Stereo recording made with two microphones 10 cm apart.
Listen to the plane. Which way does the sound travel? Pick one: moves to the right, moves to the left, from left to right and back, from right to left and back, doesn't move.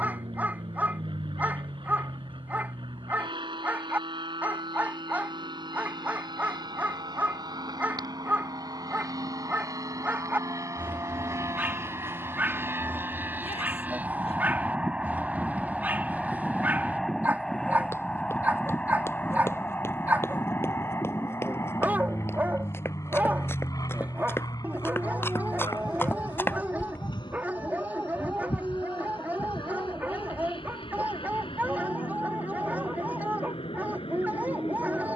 moves to the left.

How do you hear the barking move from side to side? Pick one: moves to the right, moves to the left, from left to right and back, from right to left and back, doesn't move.
doesn't move.